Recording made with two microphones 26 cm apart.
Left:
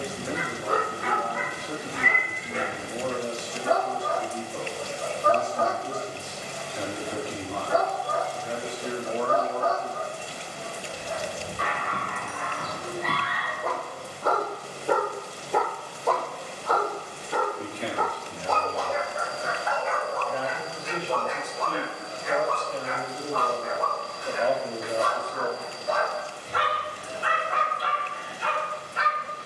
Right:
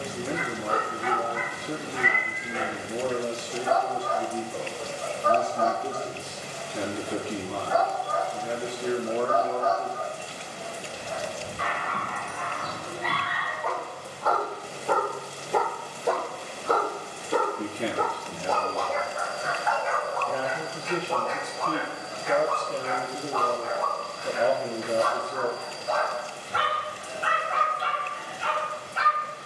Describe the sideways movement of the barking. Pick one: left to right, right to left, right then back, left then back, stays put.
right then back.